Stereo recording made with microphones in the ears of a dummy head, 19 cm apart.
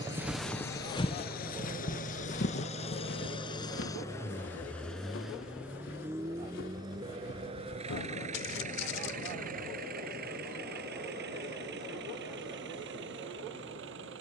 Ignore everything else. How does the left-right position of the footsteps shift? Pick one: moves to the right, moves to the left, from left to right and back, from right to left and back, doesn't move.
moves to the left.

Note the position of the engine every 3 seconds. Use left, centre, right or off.
left, centre, right, right, right.